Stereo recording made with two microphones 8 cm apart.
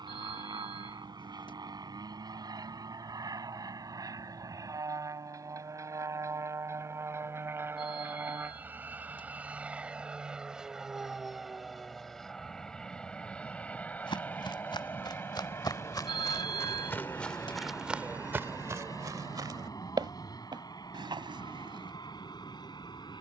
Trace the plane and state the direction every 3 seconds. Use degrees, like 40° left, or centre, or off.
60° right, 40° right, 30° right, 10° right, 10° left, 30° left, 40° left, 50° left.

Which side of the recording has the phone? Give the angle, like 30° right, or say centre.
60° left.